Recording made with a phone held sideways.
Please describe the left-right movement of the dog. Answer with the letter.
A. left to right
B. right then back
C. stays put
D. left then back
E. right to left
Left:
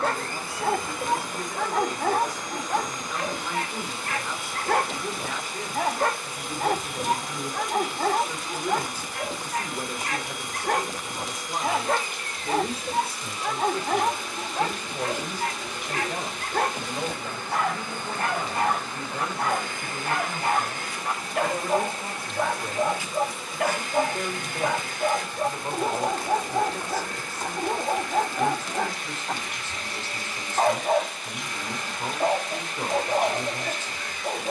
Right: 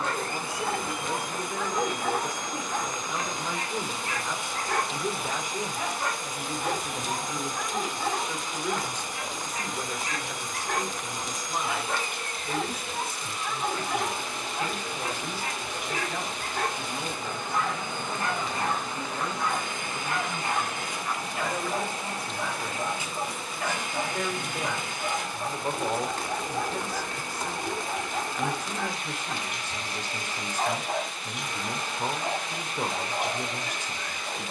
C.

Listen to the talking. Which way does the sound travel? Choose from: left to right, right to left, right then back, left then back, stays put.
left then back.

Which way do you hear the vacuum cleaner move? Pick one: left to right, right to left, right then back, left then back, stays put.
stays put.